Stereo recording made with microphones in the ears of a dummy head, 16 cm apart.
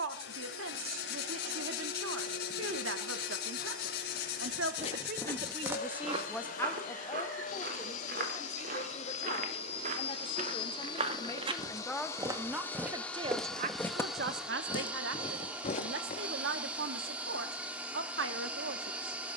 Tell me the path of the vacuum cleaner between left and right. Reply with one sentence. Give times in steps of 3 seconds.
In this clip you hear the vacuum cleaner on the left from 0 s and in the centre from 12 s.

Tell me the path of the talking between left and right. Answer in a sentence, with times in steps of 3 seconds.
You can hear the talking on the right from 0 s, on the left from 6 s and on the right from 12 s.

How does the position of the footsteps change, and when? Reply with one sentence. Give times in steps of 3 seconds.
You can hear the footsteps not at all from 0 s, on the left from 3 s, on the right from 6 s, in the centre from 12 s, on the left from 15 s and not at all from 18 s.